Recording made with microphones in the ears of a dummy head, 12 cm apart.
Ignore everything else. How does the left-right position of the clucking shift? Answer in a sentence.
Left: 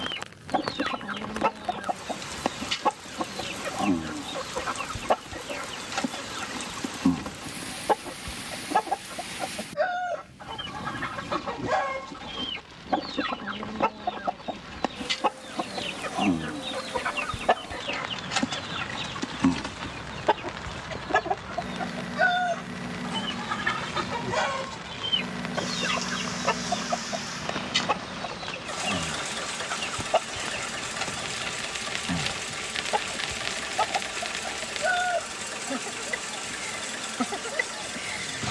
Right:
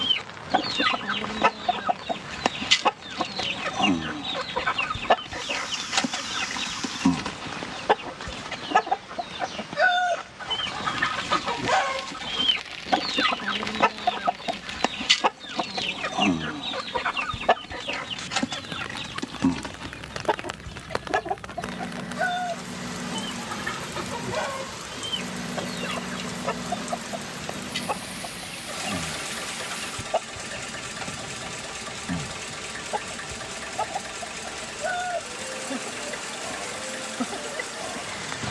In this clip you hear the clucking go from the right side to the left.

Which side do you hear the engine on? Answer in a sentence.
You can hear the engine in the centre.